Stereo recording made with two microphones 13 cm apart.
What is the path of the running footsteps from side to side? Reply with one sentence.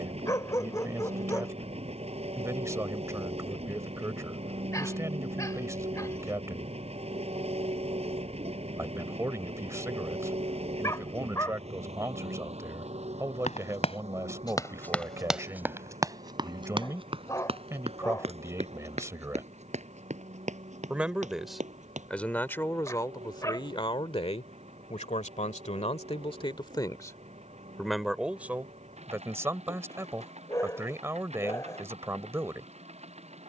In this clip you hear the running footsteps go from the left side to the right.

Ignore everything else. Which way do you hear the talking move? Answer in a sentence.
In this clip you hear the talking go left and come back.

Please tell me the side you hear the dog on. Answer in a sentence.
In this clip you hear the dog on the left.